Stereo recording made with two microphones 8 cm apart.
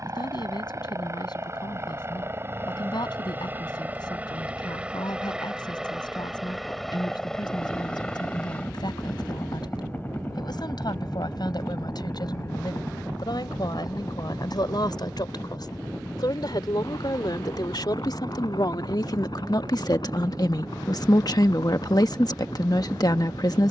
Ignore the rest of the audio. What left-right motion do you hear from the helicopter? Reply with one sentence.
You can hear the helicopter move to the left.